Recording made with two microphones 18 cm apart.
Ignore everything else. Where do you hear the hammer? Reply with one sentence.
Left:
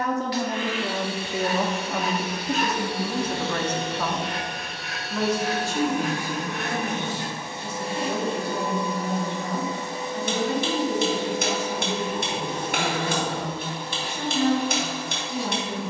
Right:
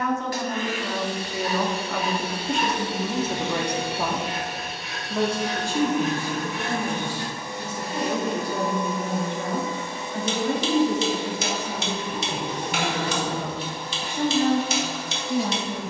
You can hear the hammer on the left.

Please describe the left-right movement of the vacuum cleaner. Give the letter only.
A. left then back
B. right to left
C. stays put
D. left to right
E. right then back
B.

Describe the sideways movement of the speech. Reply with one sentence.
You can hear the speech go from the left side to the right.